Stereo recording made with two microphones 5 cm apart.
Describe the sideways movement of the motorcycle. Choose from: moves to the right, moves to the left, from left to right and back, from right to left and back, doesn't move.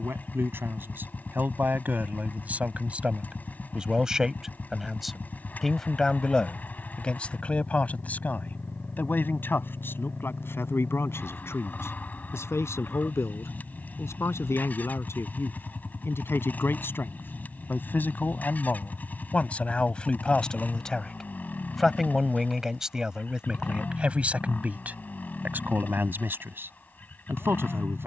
doesn't move.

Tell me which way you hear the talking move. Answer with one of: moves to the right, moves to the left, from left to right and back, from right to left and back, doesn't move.
from right to left and back.